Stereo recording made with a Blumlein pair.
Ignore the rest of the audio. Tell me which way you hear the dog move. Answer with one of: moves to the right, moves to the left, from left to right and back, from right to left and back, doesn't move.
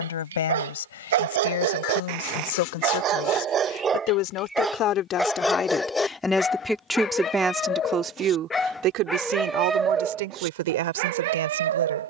from right to left and back.